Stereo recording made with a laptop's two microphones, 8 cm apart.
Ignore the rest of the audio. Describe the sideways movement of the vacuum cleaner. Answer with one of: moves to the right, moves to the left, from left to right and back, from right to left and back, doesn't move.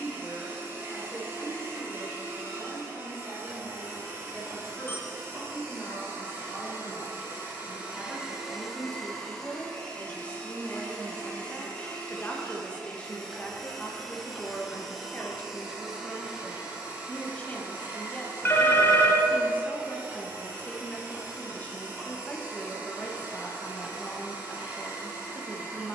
from right to left and back.